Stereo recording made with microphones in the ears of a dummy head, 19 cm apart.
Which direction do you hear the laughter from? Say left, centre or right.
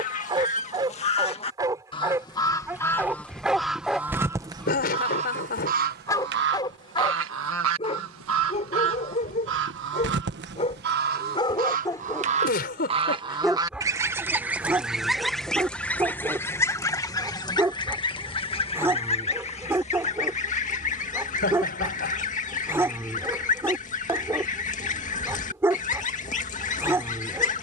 left.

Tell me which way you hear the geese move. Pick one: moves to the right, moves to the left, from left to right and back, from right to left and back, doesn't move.
from left to right and back.